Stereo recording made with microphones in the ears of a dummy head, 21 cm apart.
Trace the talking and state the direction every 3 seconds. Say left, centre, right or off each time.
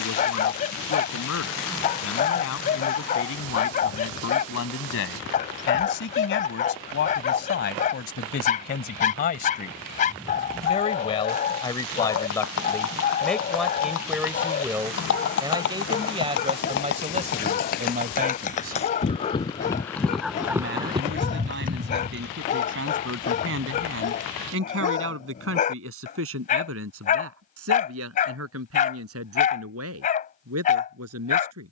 left, left, left, left, centre, right, right, right, right, right, right.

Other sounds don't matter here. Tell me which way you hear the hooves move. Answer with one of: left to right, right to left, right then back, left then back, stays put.
left to right.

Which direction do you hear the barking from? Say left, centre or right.
left.